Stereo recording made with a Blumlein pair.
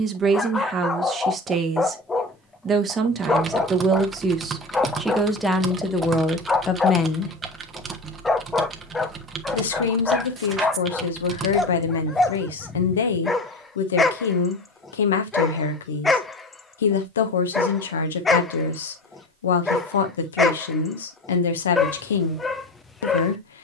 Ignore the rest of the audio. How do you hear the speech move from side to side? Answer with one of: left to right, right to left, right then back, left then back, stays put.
right to left.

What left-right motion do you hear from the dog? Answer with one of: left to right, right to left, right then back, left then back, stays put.
stays put.